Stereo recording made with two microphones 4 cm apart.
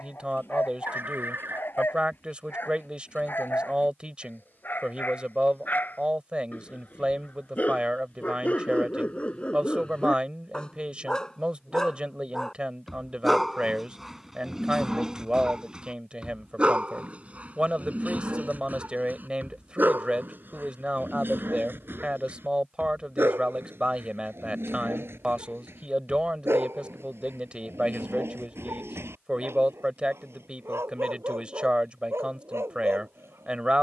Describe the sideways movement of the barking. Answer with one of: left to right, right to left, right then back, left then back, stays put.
left to right.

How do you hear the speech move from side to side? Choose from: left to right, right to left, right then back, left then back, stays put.
stays put.